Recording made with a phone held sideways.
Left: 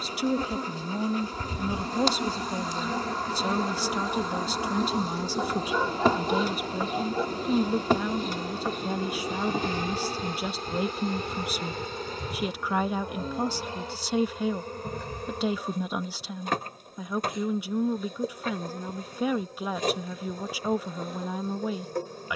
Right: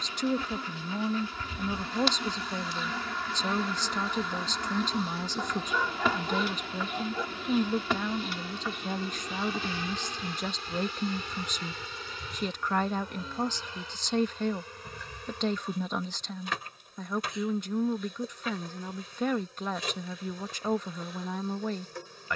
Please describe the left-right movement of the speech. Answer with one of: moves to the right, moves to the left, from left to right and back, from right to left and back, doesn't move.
doesn't move.